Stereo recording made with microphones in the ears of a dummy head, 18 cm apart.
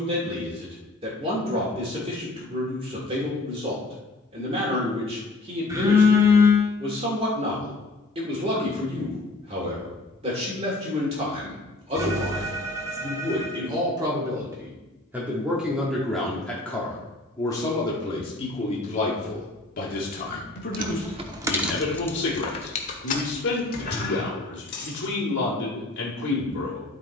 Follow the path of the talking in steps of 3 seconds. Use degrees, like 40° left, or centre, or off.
30° right, 30° right, 30° right, 30° right, 20° right, 10° left, 40° left, 60° left, 60° left.